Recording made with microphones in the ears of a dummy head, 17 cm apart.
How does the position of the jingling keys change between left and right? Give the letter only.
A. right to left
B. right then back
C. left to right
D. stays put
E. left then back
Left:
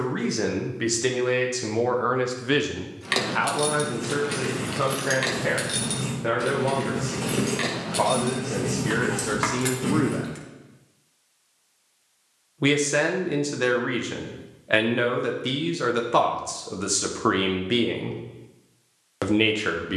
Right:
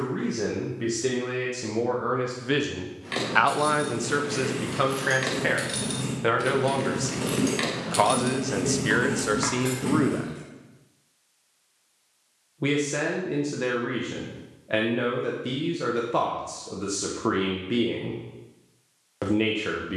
B.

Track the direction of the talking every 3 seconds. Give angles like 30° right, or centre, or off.
30° left, 70° right, 60° right, 20° right, 40° left, 40° left, 40° left.